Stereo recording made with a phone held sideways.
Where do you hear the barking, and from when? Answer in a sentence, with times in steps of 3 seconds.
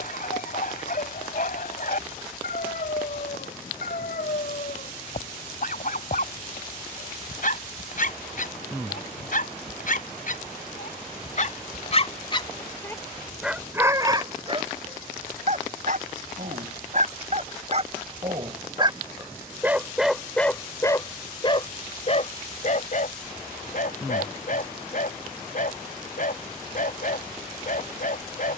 In this clip you hear the barking on the left from 0 s, in the centre from 12 s, on the right from 15 s, in the centre from 18 s and on the left from 21 s.